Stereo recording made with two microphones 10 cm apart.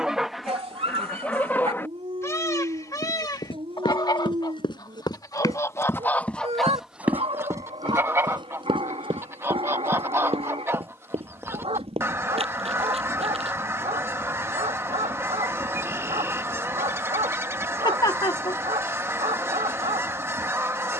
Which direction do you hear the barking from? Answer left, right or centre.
right.